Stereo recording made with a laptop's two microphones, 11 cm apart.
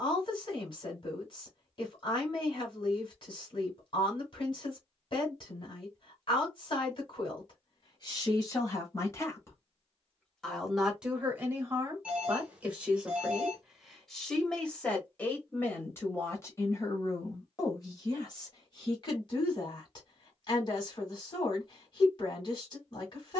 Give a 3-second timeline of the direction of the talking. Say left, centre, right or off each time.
left, left, left, centre, centre, left, left, left.